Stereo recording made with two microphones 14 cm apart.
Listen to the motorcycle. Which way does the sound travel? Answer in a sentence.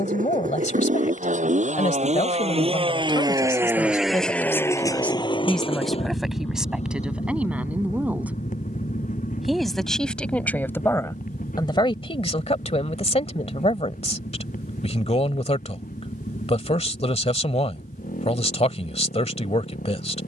You can hear the motorcycle move from right to left.